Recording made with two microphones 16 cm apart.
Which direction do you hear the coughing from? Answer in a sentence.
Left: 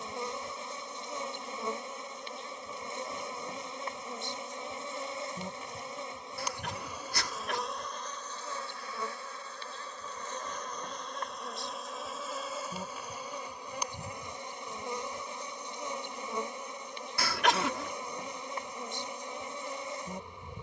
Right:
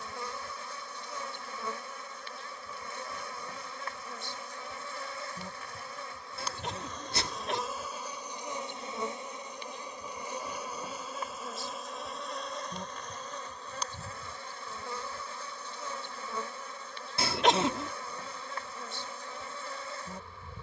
In this clip you hear the coughing on the right.